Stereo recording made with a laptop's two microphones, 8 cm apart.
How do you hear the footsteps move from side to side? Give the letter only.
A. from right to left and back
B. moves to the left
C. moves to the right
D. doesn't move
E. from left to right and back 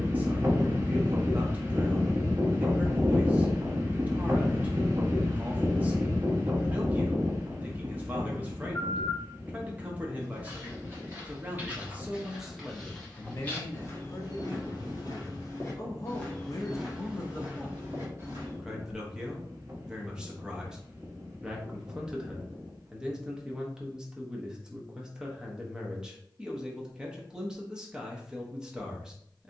A.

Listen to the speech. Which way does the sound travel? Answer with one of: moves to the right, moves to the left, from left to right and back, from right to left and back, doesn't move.
from right to left and back.